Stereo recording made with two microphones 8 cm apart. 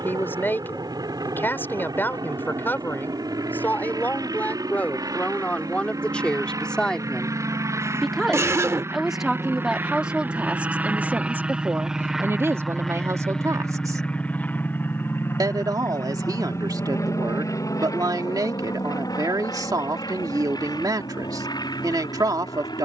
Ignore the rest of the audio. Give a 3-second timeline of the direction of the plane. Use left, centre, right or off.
right, right, right, right, centre, left, left, left.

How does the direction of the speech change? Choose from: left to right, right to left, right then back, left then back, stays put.
left to right.